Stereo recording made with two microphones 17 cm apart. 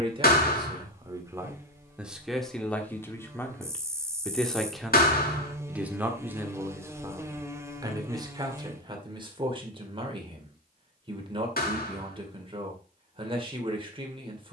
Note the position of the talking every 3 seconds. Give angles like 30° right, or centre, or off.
10° right, centre, 20° right, 30° right, 30° right.